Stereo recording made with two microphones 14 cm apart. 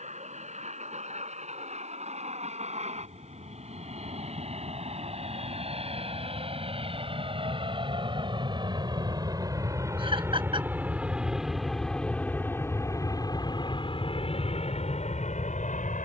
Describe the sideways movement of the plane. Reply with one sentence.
You can hear the plane move to the left.